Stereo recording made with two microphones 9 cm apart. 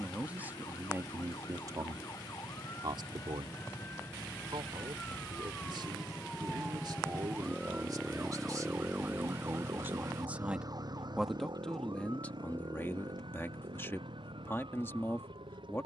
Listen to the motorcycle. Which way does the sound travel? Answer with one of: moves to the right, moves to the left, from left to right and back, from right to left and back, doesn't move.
moves to the right.